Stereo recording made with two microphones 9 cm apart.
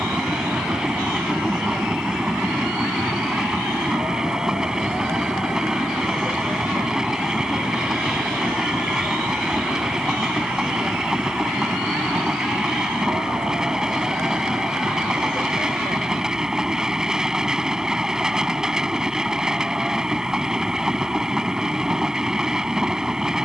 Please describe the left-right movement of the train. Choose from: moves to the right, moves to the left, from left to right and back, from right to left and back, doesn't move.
doesn't move.